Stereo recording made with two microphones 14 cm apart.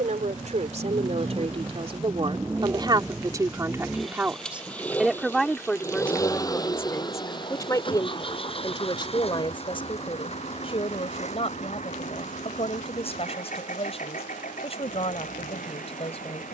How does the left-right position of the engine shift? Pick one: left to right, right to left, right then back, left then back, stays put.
right to left.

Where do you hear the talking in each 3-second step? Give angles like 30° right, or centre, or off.
50° right, 10° right, 20° left, 40° left, 40° left, 40° left.